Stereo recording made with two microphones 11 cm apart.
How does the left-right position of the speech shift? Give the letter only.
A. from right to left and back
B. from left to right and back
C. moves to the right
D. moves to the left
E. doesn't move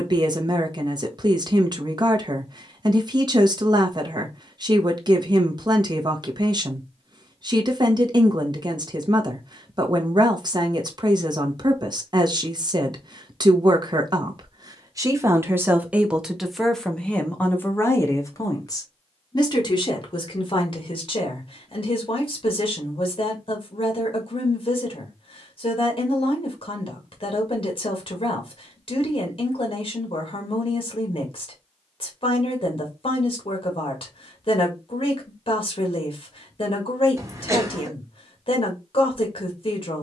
D.